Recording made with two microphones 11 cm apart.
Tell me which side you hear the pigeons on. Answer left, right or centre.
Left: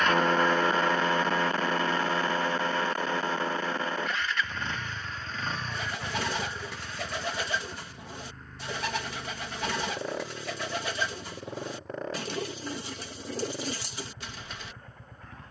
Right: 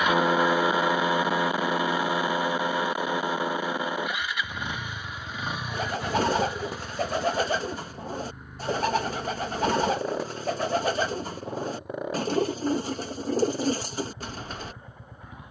right.